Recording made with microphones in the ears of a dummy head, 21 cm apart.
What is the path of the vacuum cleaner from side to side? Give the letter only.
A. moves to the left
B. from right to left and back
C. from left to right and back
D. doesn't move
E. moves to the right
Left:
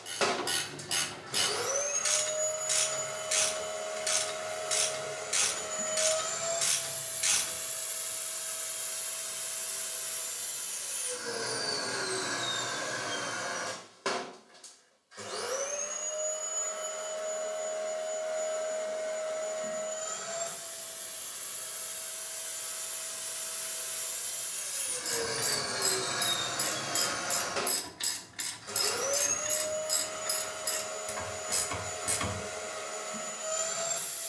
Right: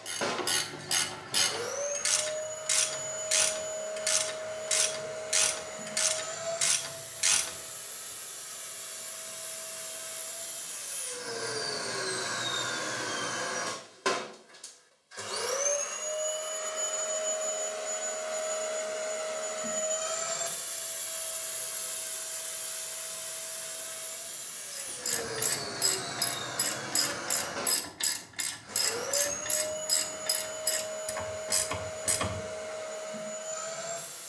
C.